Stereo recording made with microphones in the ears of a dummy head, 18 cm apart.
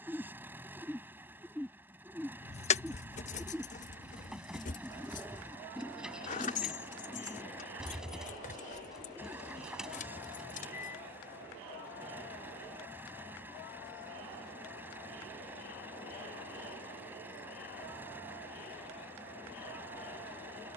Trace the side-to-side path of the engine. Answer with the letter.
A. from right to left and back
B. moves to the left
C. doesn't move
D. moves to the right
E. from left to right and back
C.